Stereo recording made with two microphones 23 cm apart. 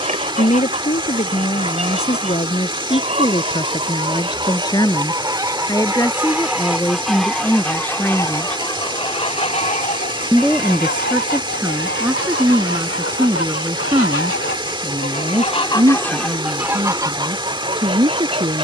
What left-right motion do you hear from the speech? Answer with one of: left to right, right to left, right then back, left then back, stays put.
left to right.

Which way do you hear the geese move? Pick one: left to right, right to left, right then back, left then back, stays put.
left then back.